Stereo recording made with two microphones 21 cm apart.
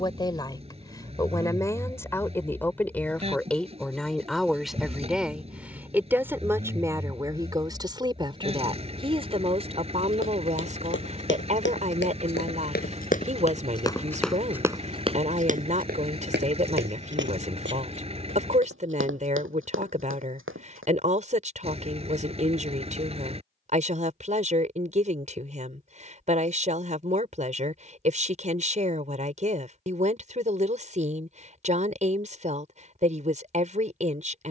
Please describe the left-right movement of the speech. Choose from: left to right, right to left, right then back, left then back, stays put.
left to right.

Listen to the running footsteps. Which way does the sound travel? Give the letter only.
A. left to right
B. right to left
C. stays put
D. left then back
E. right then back
A.